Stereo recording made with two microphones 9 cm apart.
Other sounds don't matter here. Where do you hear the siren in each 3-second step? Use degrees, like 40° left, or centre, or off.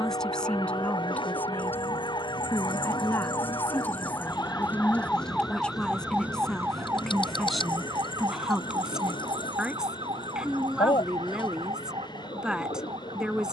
60° left, 20° left, 30° right, 60° right, 70° right.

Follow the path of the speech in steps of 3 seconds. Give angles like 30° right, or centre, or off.
20° left, 20° left, centre, 10° right, 10° right.